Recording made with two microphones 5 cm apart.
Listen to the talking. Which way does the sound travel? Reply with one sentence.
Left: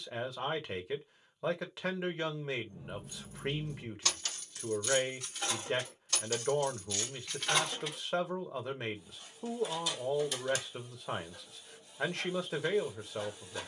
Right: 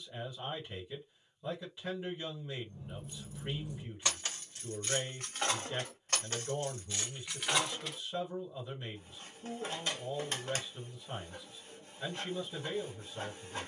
You can hear the talking stay in one place.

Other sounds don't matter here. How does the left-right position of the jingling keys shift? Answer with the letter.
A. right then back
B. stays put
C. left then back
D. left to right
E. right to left
A.